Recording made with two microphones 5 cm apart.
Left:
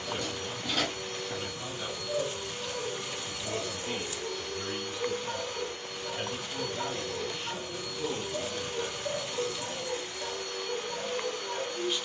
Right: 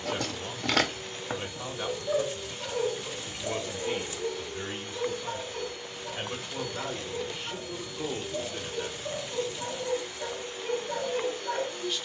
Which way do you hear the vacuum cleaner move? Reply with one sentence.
In this clip you hear the vacuum cleaner stay put.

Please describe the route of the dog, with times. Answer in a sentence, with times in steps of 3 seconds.
You can hear the dog on the right from 0 s, in the centre from 6 s and on the right from 9 s.